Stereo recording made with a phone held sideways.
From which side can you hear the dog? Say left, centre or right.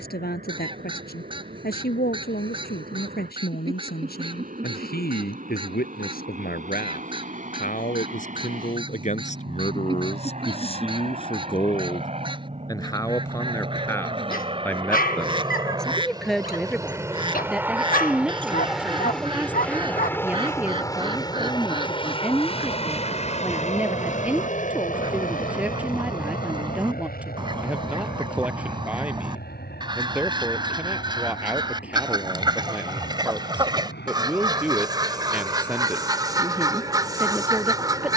left.